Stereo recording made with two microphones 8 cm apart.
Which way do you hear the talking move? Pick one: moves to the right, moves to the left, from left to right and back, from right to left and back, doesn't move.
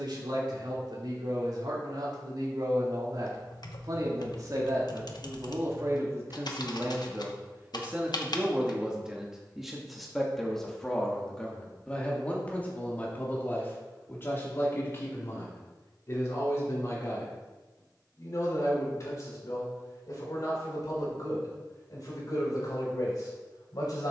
moves to the left.